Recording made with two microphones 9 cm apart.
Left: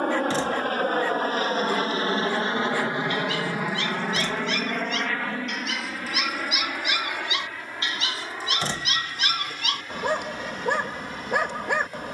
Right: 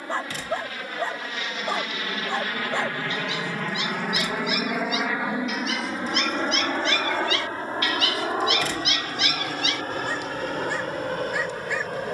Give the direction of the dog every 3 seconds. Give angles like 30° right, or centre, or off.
30° right, 10° right, 20° left, 50° left.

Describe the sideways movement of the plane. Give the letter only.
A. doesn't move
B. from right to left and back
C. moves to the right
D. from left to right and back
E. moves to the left
C.